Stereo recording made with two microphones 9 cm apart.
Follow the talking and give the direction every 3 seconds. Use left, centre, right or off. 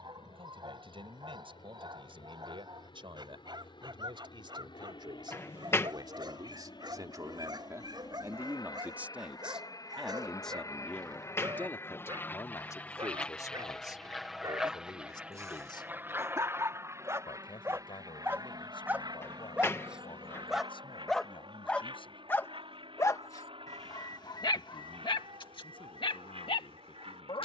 right, right, right, centre, left, left, left, left, left.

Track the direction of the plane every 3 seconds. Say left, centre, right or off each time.
left, left, left, left, centre, right, right, right, right.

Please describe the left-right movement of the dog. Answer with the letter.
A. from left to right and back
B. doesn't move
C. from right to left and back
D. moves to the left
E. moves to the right
D.